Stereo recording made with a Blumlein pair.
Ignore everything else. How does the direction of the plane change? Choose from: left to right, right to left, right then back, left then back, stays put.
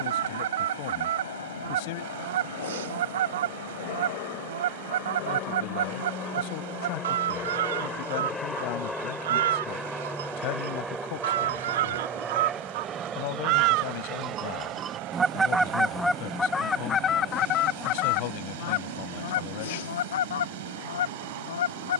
left to right.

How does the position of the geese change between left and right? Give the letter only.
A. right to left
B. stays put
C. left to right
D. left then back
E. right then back
A.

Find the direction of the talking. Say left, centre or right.
left.